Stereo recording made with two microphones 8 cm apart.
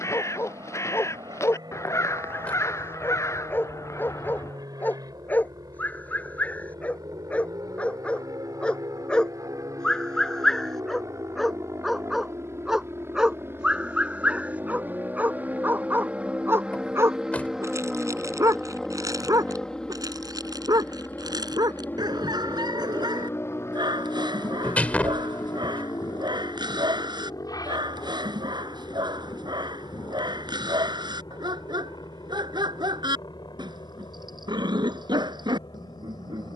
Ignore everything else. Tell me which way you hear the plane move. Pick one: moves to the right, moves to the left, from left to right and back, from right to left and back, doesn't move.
moves to the left.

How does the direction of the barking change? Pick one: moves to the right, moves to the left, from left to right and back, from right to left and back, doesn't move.
moves to the right.